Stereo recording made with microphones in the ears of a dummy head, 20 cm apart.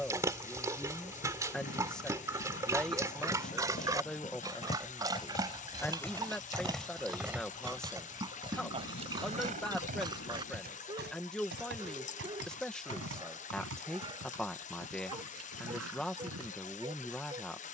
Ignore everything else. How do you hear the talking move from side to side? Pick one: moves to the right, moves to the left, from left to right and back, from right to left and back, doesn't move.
doesn't move.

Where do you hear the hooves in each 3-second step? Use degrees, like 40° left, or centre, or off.
50° left, 30° left, 10° right, 40° right, 60° right, 70° right.